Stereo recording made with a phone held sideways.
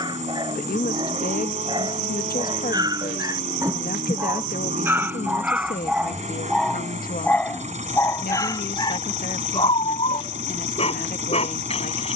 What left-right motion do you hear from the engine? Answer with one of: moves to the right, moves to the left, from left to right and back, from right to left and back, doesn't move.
doesn't move.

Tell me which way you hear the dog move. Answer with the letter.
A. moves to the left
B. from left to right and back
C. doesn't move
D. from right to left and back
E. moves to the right
A.